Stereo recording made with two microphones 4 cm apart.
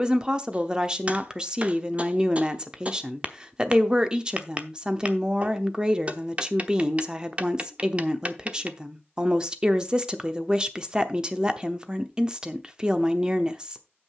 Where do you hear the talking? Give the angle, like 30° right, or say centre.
20° right.